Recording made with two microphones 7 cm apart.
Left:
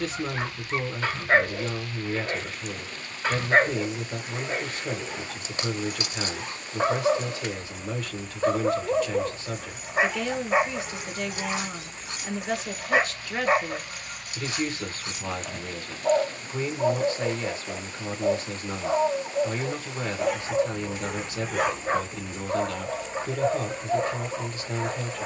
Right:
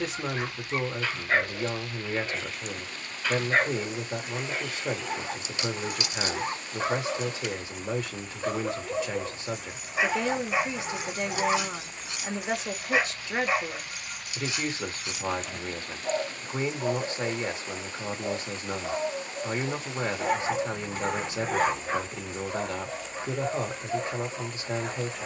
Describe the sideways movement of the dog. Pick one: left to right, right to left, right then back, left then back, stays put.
stays put.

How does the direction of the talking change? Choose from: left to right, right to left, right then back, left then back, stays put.
stays put.